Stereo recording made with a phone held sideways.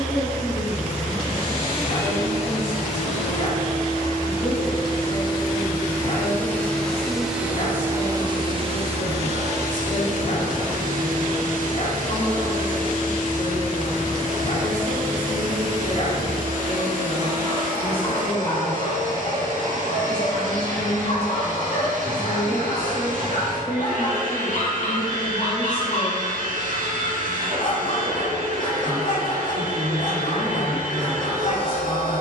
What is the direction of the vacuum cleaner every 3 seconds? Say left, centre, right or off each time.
left, left, centre, right, right, right, right, right, right, right, right.